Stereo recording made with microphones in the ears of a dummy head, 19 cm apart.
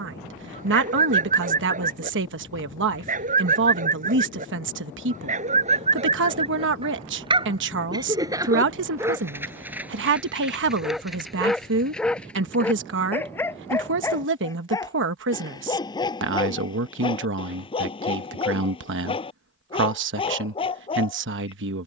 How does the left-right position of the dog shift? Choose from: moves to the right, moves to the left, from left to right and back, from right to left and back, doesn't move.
moves to the left.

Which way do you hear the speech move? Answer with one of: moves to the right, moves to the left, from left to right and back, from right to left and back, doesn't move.
doesn't move.